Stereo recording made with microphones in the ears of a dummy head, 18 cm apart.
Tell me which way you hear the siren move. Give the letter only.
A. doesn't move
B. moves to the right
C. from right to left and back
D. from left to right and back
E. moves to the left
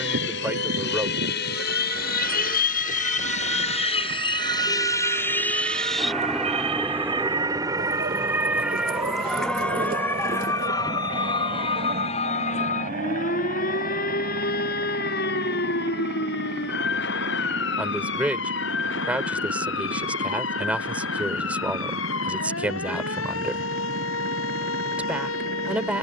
E.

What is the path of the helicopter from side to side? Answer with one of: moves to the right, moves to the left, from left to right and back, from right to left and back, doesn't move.
moves to the right.